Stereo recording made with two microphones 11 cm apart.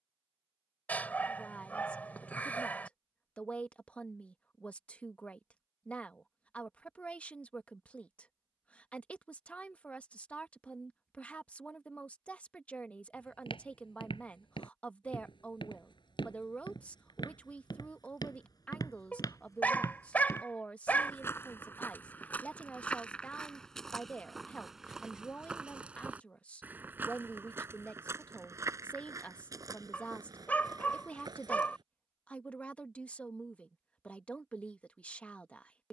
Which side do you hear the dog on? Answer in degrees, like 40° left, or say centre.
20° left.